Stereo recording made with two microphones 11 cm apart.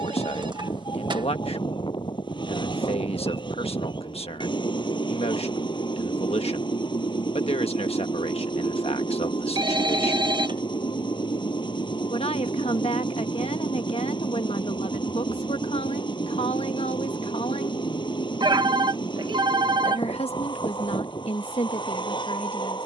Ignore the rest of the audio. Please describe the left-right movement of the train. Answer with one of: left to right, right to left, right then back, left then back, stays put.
stays put.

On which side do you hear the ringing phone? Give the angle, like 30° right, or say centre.
50° right.